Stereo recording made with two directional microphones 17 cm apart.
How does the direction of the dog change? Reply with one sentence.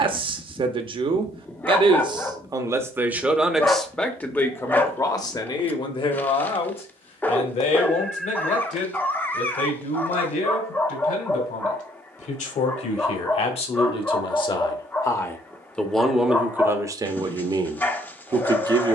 You can hear the dog stay put.